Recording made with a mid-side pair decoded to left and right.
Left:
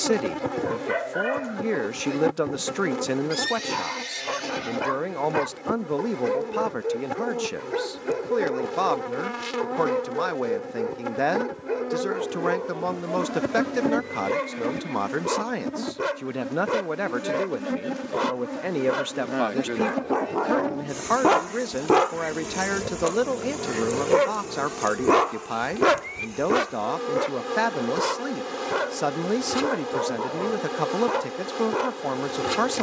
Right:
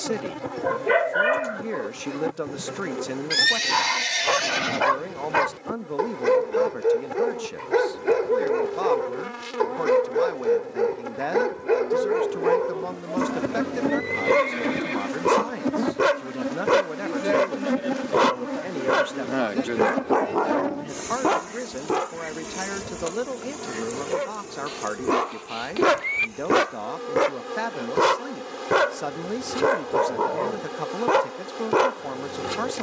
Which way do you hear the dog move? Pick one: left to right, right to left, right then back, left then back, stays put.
left then back.